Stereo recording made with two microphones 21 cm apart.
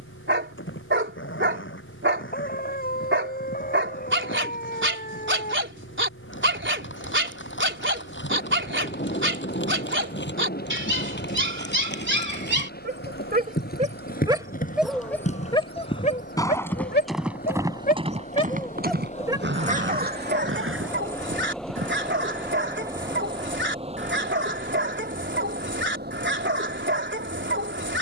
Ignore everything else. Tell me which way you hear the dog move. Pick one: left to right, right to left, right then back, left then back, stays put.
left then back.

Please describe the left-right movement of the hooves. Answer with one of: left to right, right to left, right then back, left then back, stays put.
left to right.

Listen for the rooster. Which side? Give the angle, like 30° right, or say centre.
40° left.